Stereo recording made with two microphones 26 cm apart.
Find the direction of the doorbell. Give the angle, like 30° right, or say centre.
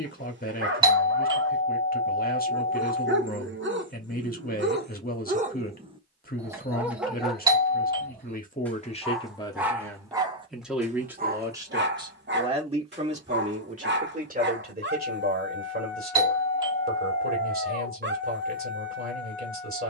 20° right.